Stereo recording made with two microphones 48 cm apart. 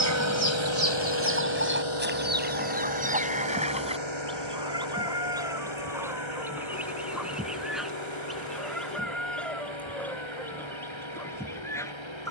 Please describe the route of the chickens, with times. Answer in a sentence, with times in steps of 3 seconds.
You can hear the chickens on the right from 0 s and in the centre from 3 s.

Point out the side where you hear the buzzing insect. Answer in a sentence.
You can hear the buzzing insect on the left.